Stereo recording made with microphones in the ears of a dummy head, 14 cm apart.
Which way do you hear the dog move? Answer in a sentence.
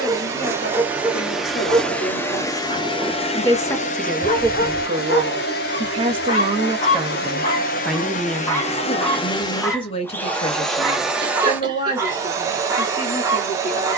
In this clip you hear the dog move from right to left and back again.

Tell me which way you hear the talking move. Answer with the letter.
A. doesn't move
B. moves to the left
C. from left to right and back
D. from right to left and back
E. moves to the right
C.